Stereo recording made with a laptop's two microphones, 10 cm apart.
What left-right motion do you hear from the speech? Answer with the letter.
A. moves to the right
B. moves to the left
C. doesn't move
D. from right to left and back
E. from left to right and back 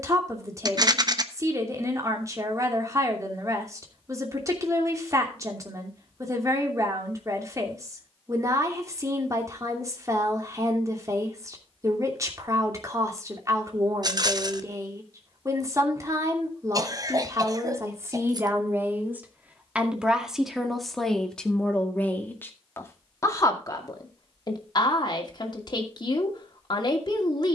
B.